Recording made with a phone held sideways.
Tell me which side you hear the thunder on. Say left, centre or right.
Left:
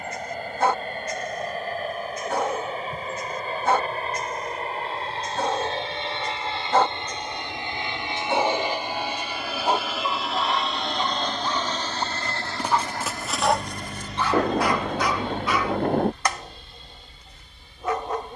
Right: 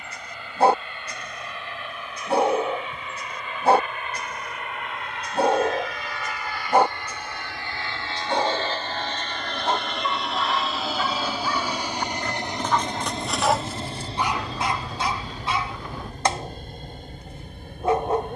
left.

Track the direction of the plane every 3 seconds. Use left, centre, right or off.
left, left, left, centre, right, right.